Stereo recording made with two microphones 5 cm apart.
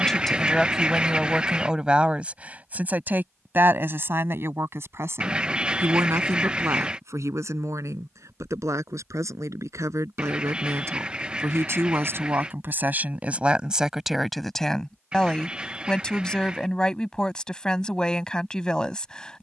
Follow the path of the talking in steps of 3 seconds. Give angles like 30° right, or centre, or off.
10° right, 50° right, 70° right, 70° right, 20° right, 10° left, 10° left.